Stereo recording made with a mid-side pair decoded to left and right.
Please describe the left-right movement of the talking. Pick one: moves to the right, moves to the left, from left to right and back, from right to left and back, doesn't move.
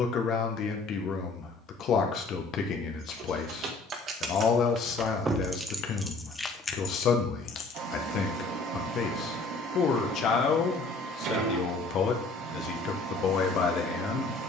doesn't move.